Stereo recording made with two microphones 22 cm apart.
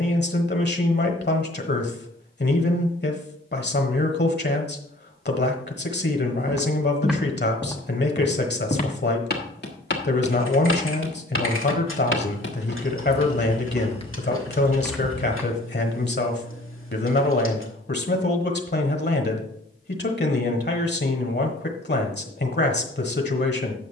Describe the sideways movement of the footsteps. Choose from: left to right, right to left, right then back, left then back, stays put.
left then back.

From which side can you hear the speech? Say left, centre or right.
left.